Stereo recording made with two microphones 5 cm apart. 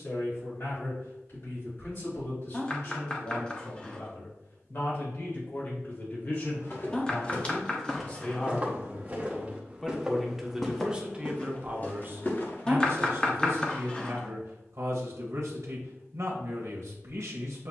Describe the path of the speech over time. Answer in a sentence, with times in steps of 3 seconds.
You can hear the speech on the left from 0 s, in the centre from 9 s and on the right from 12 s.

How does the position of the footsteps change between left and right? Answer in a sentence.
In this clip you hear the footsteps move from left to right and back again.